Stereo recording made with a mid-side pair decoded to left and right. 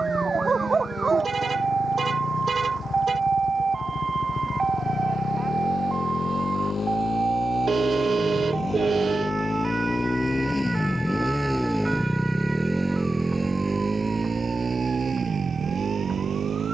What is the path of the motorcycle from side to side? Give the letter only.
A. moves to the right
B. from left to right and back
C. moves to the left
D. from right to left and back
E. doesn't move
A.